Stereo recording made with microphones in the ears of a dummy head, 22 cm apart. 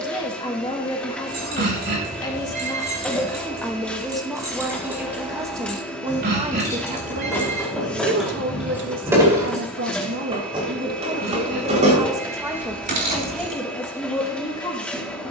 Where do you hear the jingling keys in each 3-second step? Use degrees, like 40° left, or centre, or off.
40° right, 10° right, centre, 20° right, 40° right.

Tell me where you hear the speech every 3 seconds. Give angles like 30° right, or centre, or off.
20° left, centre, 40° right, 40° right, centre.